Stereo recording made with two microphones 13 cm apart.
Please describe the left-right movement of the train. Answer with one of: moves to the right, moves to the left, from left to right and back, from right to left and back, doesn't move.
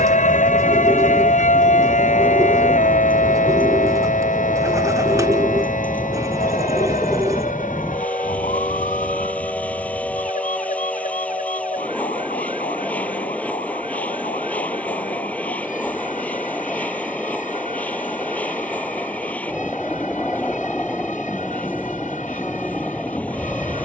doesn't move.